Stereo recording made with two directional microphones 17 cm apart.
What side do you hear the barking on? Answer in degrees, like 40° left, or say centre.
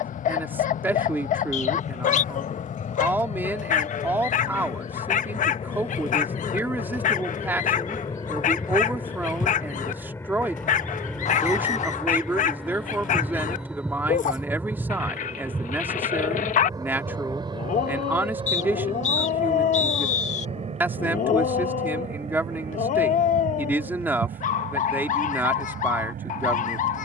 50° left.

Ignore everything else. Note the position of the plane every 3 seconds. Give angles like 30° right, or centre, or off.
50° left, 40° left, 30° left, 10° left, centre, 20° right, 30° right, 40° right, 50° right.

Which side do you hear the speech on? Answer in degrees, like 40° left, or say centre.
10° right.